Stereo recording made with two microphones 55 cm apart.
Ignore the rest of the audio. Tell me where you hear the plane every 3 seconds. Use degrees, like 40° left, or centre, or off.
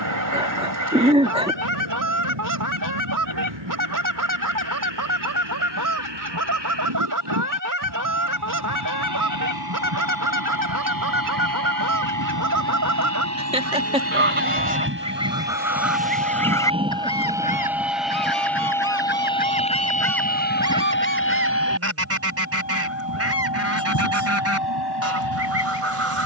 60° right, 60° right, 50° right, 40° right, 30° right, 10° right, 10° left, 30° left, 40° left.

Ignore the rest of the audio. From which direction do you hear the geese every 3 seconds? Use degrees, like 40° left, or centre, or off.
30° right, 30° right, 30° right, 30° right, 30° right, centre, 10° left, 20° right, 30° right.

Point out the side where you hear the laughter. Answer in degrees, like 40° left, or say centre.
10° right.